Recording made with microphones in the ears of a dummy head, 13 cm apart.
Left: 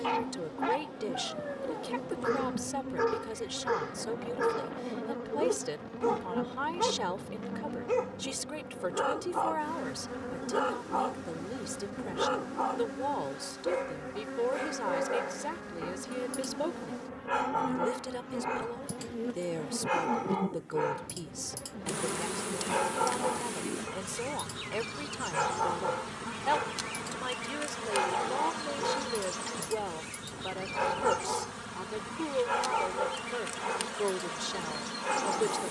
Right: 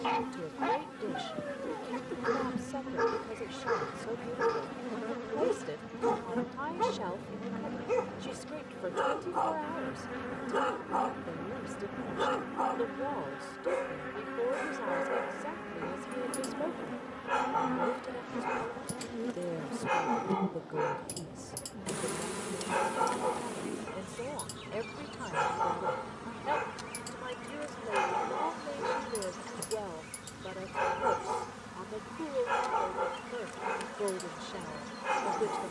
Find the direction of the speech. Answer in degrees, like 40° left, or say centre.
60° left.